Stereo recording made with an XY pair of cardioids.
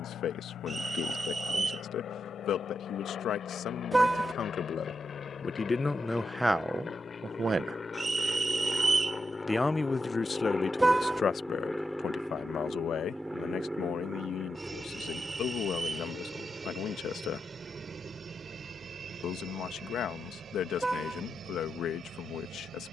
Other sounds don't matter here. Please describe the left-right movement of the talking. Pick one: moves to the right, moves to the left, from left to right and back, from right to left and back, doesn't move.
from left to right and back.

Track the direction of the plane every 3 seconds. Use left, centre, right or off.
left, left, left, centre, centre, right, right, right.